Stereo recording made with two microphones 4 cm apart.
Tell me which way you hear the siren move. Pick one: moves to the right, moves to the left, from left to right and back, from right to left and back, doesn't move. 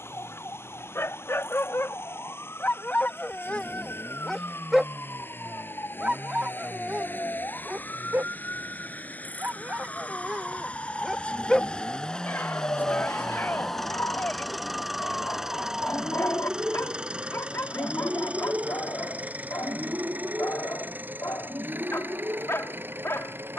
moves to the right.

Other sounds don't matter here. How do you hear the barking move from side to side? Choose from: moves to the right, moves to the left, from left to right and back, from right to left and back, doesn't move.
from left to right and back.